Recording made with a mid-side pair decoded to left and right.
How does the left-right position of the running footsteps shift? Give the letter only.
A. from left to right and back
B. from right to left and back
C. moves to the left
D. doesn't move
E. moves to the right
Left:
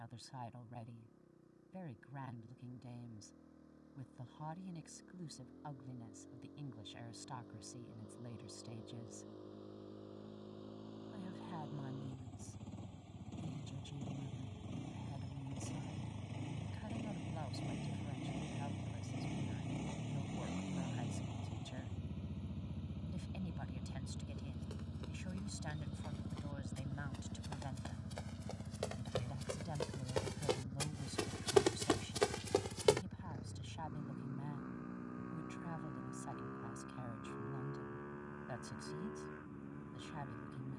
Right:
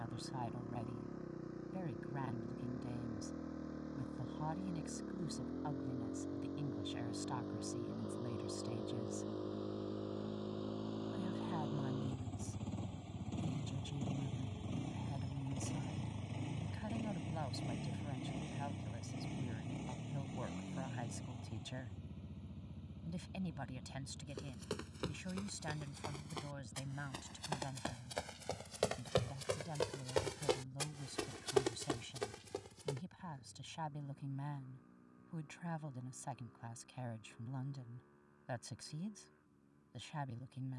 C.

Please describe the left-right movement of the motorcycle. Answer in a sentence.
In this clip you hear the motorcycle travel towards the left.